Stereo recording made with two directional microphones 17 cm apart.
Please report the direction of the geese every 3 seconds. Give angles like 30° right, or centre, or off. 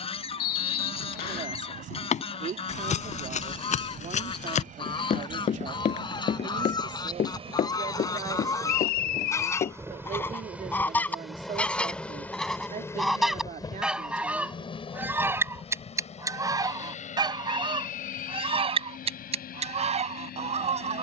30° left, 30° left, 20° left, 10° left, centre, 20° right, 40° right.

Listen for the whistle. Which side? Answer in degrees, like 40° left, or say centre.
70° left.